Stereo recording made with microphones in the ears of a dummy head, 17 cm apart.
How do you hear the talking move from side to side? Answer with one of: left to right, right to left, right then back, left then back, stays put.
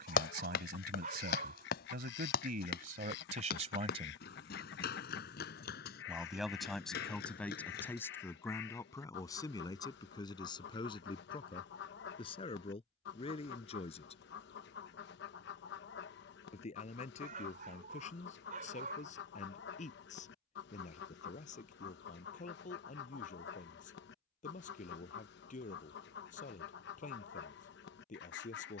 right to left.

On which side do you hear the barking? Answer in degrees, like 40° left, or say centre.
40° right.